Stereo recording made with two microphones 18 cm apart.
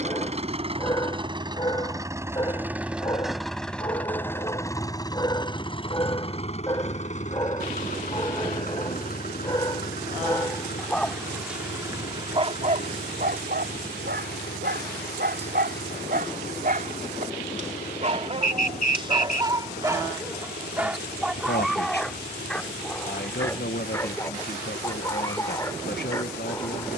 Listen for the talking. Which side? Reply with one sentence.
In this clip you hear the talking on the left.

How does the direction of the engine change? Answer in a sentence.
You can hear the engine go from the right side to the left.